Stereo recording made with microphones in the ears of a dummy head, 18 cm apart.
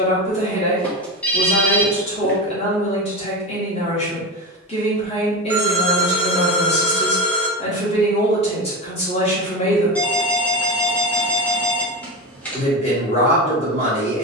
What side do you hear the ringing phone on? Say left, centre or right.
centre.